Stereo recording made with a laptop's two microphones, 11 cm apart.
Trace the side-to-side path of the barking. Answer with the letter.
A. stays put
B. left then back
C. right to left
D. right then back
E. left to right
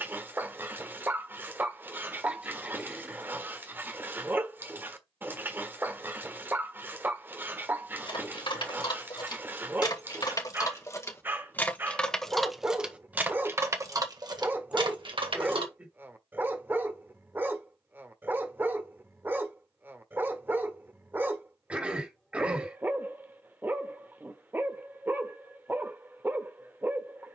A.